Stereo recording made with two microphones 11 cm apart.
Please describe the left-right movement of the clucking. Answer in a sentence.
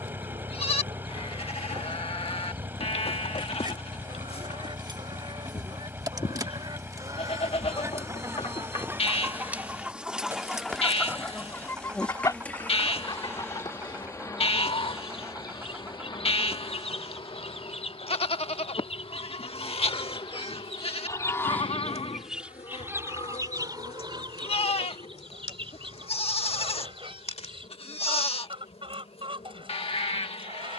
You can hear the clucking move from right to left and back again.